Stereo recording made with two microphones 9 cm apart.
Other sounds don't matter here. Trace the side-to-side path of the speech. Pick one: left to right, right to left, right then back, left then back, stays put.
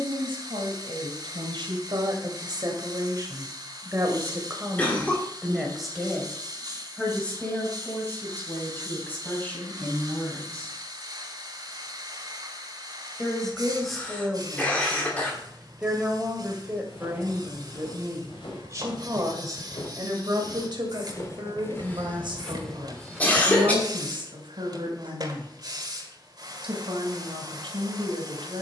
left then back.